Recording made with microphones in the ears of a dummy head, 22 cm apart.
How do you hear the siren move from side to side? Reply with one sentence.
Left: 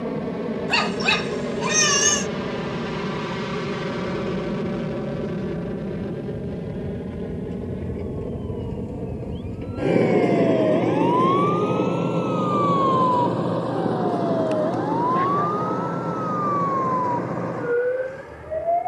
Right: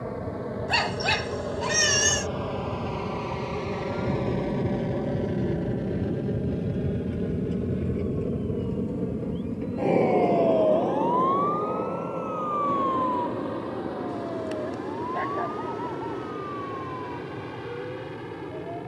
In this clip you hear the siren go from the right side to the left.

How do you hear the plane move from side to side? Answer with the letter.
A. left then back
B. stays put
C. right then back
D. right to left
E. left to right
E.